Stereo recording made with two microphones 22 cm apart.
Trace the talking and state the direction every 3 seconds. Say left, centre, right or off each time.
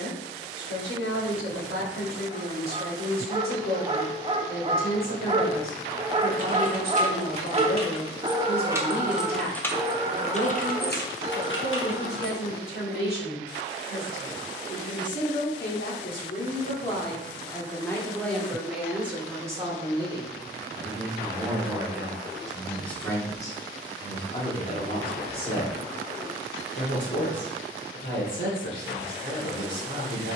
left, left, left, left, left, left, centre, centre, left, left.